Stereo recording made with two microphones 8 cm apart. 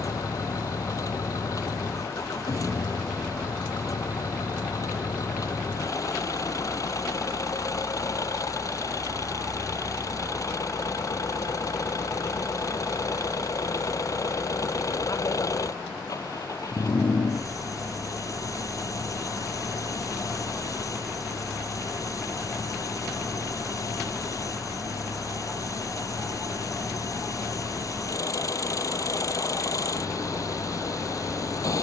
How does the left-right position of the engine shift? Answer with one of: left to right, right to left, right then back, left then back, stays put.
stays put.